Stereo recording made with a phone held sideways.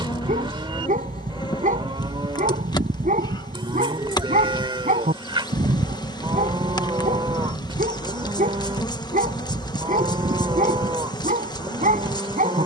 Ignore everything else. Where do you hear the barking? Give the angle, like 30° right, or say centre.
60° right.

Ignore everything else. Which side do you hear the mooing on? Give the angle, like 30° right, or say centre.
30° right.